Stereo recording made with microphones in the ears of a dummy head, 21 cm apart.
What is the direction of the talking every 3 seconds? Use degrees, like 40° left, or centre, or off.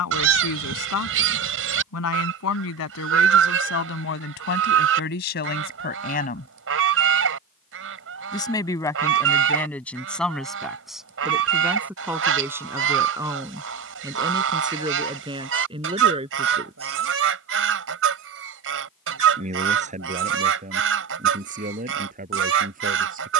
70° left, 50° left, 20° left, centre, 10° right, 20° right, 30° right, 40° right.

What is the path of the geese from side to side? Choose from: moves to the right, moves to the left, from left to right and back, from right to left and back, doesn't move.
doesn't move.